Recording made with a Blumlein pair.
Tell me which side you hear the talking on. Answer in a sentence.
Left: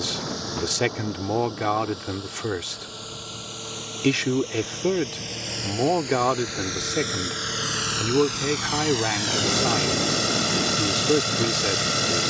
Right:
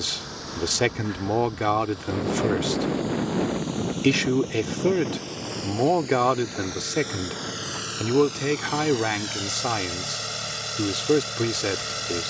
You can hear the talking in the centre.